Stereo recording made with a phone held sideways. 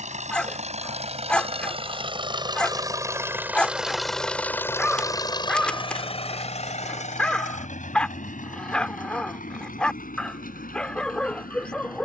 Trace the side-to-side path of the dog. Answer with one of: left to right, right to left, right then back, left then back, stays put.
stays put.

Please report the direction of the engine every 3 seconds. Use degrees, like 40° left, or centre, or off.
40° right, 10° left, 60° left, 70° left.